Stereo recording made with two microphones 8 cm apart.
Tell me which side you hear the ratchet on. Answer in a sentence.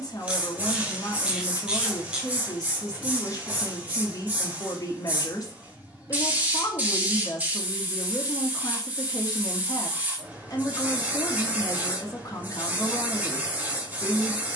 You can hear the ratchet in the centre.